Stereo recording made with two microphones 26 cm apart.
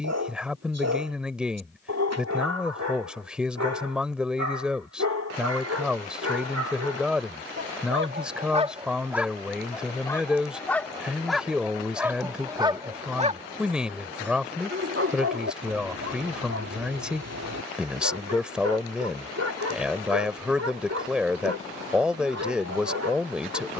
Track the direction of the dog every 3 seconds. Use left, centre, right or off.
right, right, right, centre, right, right, right, right.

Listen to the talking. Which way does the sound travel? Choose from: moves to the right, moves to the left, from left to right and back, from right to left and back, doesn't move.
doesn't move.